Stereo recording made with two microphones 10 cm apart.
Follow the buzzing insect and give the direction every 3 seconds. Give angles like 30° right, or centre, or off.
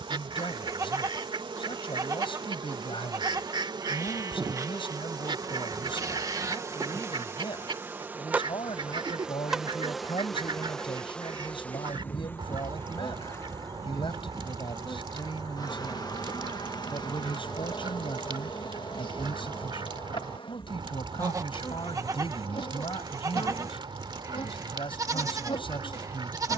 60° right, 40° right, 20° right, centre, 30° left, 50° left, 60° left, 60° left, 70° left.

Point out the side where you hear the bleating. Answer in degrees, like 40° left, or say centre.
40° right.